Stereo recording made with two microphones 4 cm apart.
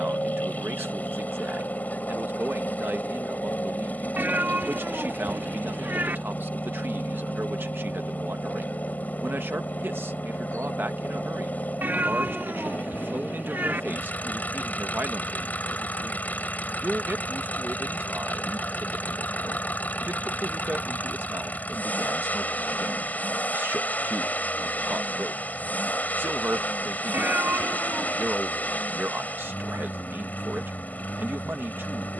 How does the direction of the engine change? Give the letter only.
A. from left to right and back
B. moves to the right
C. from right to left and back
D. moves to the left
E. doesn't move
E.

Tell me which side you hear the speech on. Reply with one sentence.
In this clip you hear the speech on the right.